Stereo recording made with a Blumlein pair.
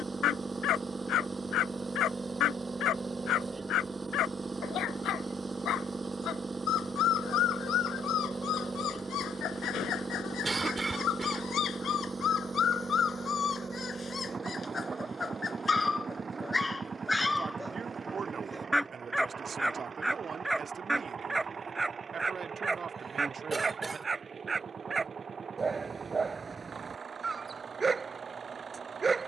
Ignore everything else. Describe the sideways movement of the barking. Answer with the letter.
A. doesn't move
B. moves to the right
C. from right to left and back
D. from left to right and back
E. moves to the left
B.